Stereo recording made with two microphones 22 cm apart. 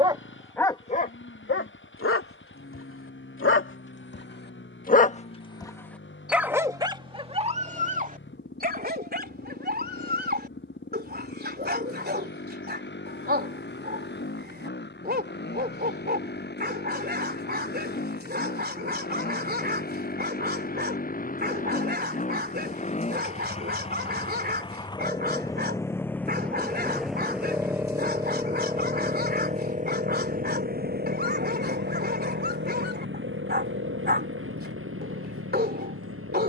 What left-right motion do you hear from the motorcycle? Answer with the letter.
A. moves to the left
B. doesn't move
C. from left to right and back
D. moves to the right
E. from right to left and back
D.